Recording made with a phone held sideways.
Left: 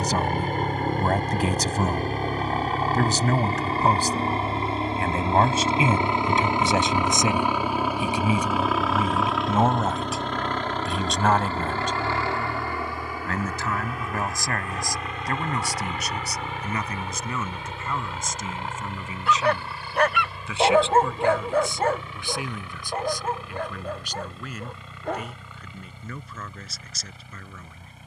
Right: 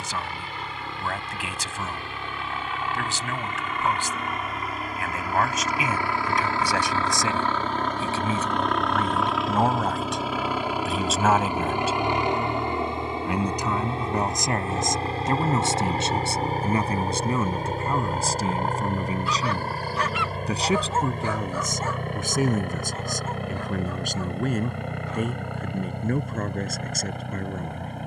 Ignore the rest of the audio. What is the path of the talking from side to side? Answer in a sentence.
You can hear the talking move from left to right.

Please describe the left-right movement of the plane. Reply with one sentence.
In this clip you hear the plane move from left to right.